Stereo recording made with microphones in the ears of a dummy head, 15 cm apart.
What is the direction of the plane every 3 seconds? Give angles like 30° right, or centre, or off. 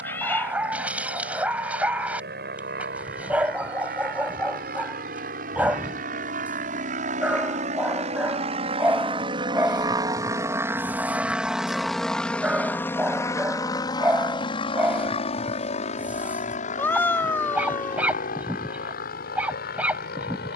70° right, 60° right, 50° right, 20° right, 20° left, 40° left, 50° left.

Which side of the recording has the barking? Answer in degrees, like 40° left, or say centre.
10° right.